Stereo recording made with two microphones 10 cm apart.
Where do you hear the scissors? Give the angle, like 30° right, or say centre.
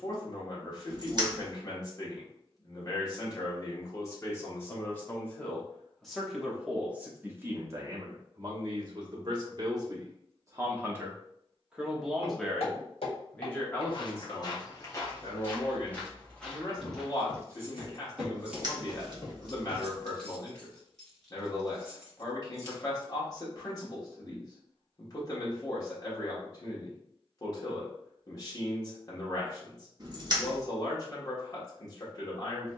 40° right.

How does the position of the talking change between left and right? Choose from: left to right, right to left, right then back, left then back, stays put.
right then back.